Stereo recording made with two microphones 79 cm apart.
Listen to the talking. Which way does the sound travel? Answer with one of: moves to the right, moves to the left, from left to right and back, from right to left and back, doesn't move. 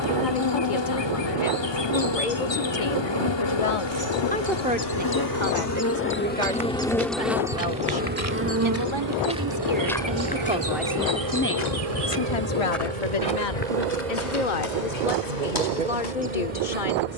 from left to right and back.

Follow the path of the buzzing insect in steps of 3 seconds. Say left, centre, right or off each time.
left, left, centre, right, right, right.